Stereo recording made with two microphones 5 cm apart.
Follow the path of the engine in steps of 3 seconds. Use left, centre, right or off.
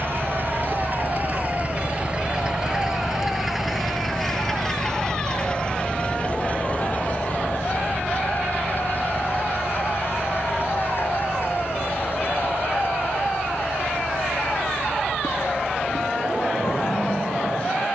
right, centre, left, left, left, left.